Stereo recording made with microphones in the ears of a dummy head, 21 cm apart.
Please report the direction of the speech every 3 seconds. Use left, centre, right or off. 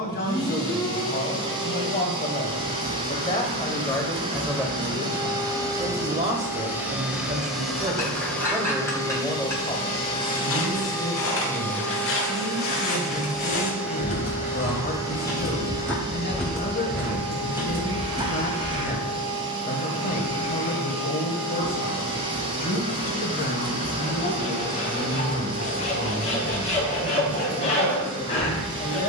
left, centre, right, left, left, left, left, left, left, left.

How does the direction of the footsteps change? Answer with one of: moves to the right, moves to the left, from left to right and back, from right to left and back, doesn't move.
moves to the right.